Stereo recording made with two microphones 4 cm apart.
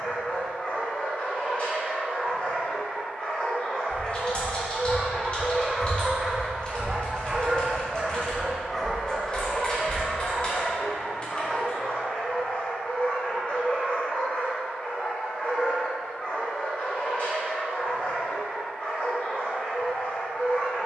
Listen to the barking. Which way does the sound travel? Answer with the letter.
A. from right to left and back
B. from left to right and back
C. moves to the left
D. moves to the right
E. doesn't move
B.